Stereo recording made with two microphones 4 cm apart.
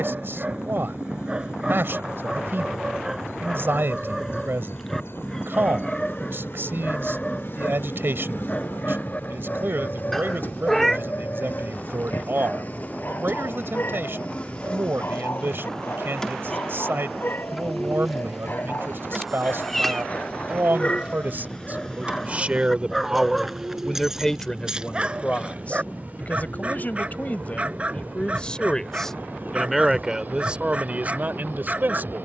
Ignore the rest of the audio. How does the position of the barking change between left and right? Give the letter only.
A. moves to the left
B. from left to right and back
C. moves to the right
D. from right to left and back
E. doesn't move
D.